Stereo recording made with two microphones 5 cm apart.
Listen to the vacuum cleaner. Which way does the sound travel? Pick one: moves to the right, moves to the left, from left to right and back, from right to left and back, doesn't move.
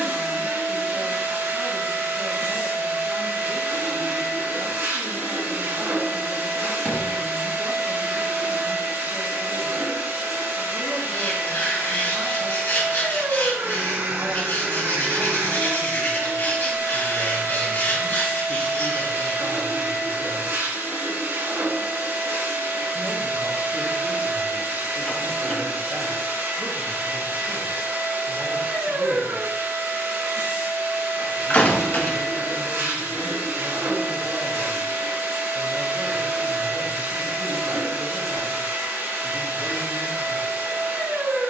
doesn't move.